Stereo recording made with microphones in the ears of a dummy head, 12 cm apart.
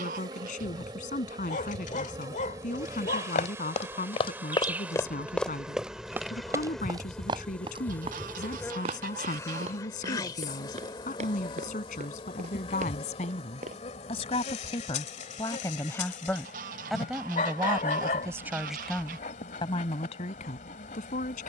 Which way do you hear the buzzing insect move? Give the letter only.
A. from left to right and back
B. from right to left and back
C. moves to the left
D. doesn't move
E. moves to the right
C.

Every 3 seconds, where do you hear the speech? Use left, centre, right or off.
left, left, left, left, left, centre, left.